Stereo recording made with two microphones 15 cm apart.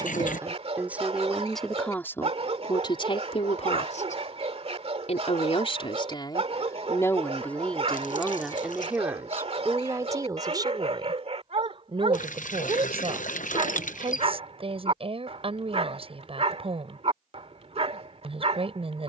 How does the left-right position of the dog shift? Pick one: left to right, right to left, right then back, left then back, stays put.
stays put.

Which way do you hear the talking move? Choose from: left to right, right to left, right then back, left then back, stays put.
left then back.